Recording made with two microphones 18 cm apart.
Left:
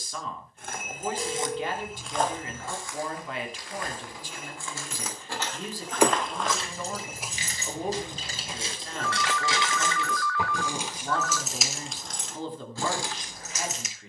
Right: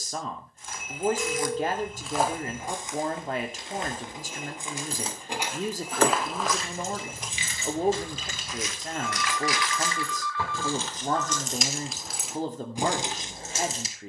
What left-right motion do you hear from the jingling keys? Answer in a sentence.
You can hear the jingling keys go left and come back.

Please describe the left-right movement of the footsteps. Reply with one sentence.
In this clip you hear the footsteps move from left to right and back again.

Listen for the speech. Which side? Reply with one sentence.
In this clip you hear the speech on the right.